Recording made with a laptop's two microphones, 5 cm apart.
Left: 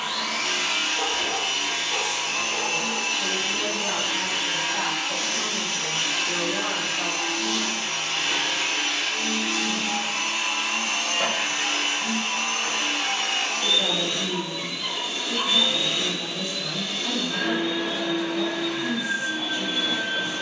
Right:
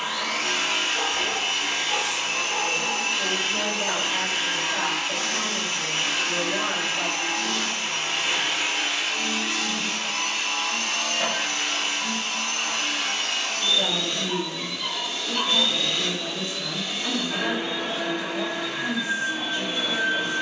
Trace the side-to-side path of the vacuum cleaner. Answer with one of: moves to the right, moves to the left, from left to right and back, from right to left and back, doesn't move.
from right to left and back.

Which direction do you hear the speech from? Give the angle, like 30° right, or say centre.
40° right.